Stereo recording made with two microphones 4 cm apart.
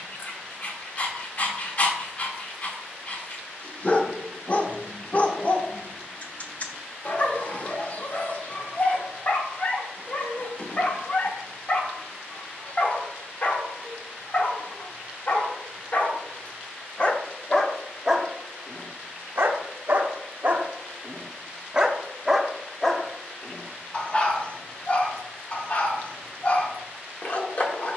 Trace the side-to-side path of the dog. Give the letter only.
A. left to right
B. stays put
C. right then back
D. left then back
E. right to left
C.